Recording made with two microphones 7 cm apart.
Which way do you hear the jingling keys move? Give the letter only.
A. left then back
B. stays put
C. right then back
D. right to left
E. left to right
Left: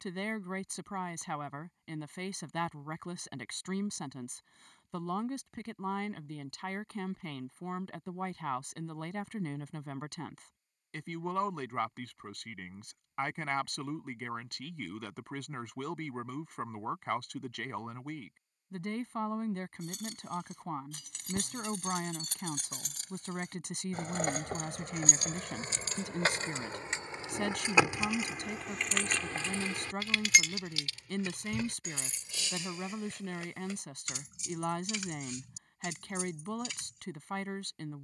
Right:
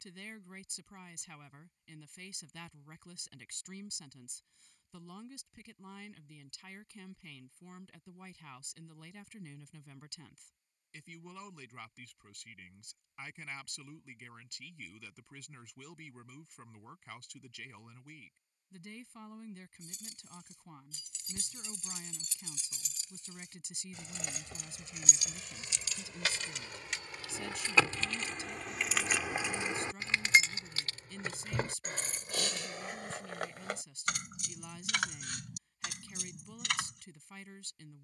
E.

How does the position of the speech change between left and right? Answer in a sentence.
In this clip you hear the speech stay put.